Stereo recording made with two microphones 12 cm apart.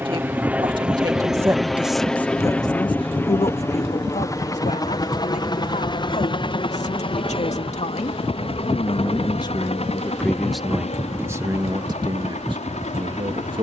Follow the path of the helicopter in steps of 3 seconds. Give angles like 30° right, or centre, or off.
centre, 30° left, 50° left, 60° left, 60° left.